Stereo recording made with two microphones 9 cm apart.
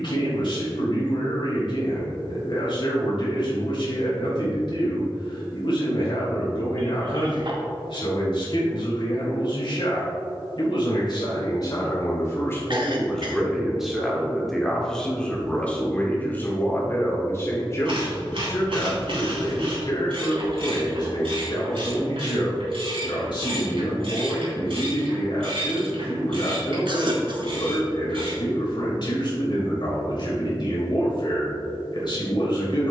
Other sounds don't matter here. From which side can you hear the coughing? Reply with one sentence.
You can hear the coughing on the right.